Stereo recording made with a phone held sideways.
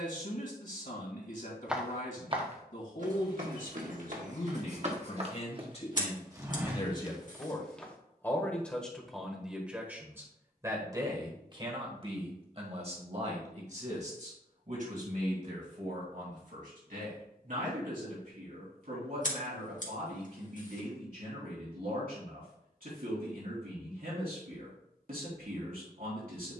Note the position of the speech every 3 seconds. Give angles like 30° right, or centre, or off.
60° left, 50° left, 20° left, 20° right, 50° right, 60° right, 70° right, 70° right, 70° right.